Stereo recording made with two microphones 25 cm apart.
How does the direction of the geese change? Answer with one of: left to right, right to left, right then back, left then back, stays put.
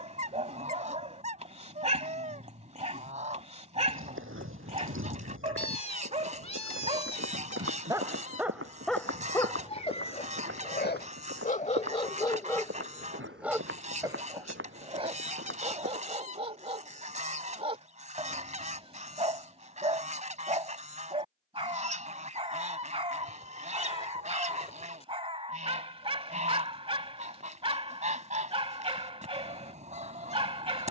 stays put.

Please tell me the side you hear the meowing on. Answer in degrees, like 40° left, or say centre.
30° left.